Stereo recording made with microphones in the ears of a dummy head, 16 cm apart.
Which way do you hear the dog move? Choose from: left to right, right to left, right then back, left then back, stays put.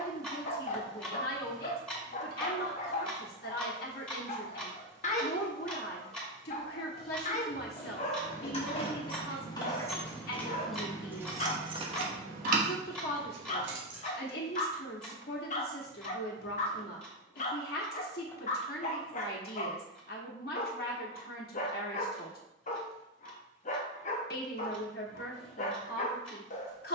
stays put.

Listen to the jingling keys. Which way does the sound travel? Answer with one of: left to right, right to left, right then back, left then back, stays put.
left to right.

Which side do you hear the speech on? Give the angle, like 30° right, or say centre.
60° left.